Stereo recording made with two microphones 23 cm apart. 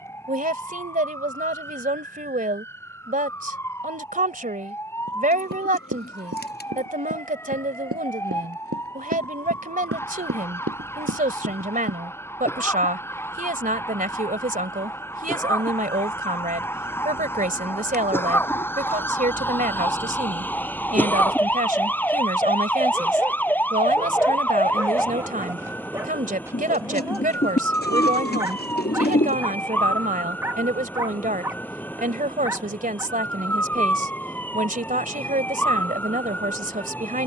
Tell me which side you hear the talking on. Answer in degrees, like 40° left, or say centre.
40° right.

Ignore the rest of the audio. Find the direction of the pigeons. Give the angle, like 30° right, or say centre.
50° left.